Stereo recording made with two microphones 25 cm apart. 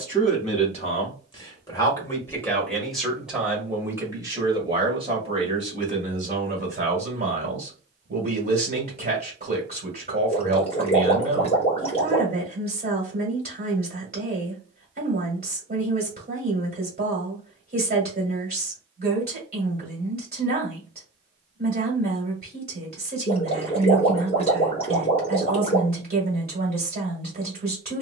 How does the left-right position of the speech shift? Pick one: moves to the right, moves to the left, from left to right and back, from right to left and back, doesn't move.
moves to the right.